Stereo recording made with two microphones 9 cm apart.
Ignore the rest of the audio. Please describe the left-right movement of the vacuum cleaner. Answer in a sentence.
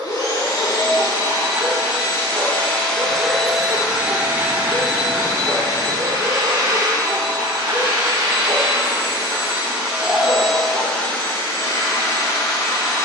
You can hear the vacuum cleaner move from left to right and back again.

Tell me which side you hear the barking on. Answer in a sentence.
In this clip you hear the barking on the right.